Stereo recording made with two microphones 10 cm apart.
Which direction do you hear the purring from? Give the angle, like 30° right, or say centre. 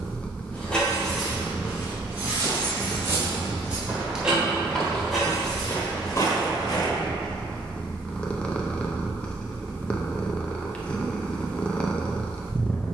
10° left.